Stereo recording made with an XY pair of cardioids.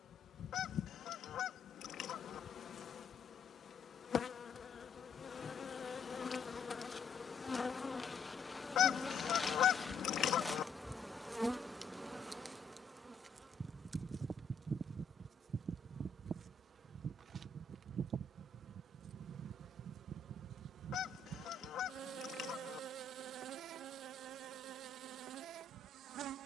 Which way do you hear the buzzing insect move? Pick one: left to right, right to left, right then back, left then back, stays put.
left to right.